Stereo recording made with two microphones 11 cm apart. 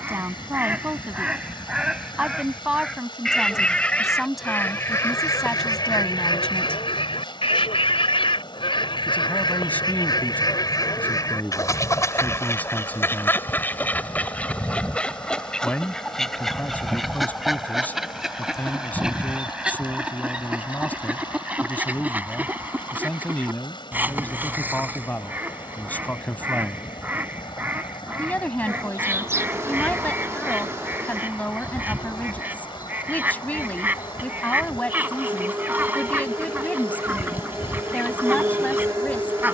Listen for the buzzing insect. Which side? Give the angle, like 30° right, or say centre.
20° right.